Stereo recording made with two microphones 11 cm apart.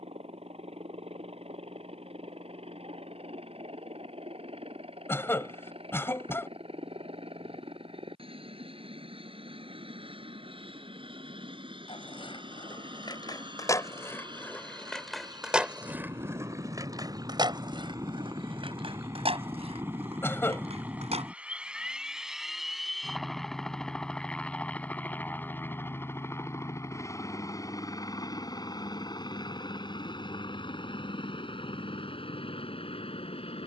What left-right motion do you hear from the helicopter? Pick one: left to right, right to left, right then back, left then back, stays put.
right to left.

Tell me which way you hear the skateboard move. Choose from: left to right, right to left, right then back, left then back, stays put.
left to right.